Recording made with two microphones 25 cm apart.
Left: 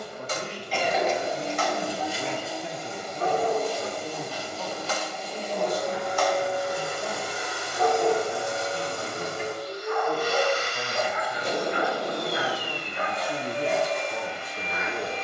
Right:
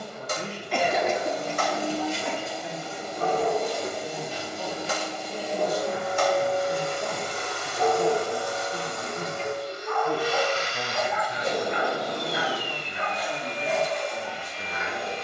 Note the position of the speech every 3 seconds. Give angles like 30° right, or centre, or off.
50° left, 10° right, 40° right, 30° right, 30° left.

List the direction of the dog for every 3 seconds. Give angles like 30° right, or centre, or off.
50° right, 30° right, 10° right, 30° left, 50° left.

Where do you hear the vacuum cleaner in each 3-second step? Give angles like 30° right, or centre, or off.
20° left, 10° right, 10° left, 50° left, 60° left.